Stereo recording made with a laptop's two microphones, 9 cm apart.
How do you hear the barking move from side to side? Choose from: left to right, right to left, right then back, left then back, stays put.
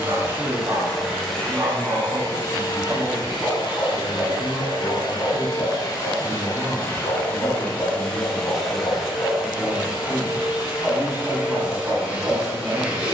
left then back.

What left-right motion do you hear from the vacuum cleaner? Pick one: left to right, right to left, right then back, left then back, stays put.
left then back.